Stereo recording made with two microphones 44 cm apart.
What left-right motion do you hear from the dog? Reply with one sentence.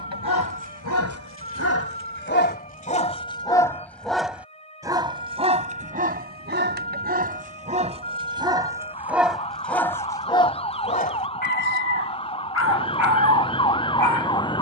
You can hear the dog move from left to right and back again.